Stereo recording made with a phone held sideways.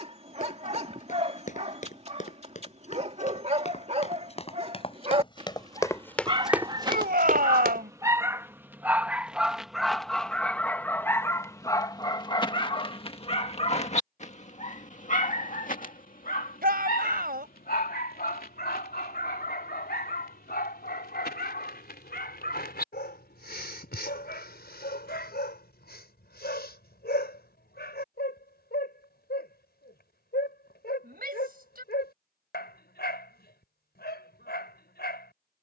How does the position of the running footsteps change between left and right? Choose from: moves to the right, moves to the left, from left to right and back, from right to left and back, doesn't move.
moves to the right.